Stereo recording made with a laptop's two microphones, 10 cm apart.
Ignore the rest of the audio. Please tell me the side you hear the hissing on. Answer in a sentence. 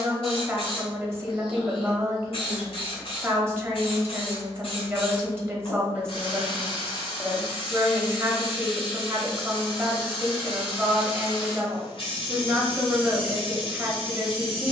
In this clip you hear the hissing on the left.